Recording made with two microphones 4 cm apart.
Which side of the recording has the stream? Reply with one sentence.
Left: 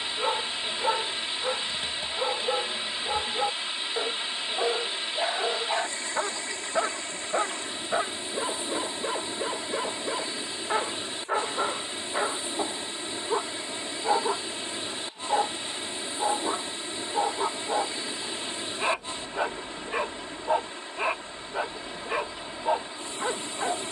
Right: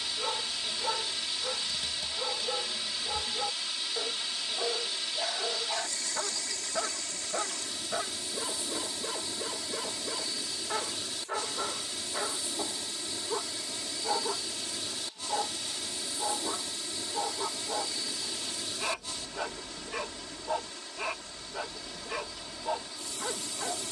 You can hear the stream on the left.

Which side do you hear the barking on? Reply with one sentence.
You can hear the barking on the left.